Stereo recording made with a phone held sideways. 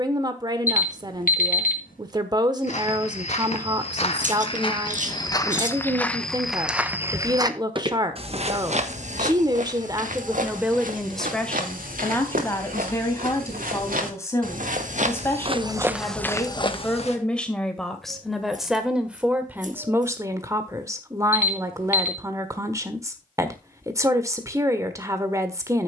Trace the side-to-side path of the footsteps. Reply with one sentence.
In this clip you hear the footsteps go right and come back.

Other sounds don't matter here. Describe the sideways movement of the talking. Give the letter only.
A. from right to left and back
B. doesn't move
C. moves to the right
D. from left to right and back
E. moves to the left
A.